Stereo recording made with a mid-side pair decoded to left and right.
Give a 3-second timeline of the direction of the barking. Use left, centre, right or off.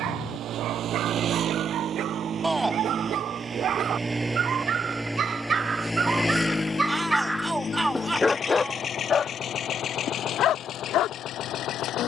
right, right, centre, left.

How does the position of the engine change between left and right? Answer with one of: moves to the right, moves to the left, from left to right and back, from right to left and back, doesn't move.
moves to the left.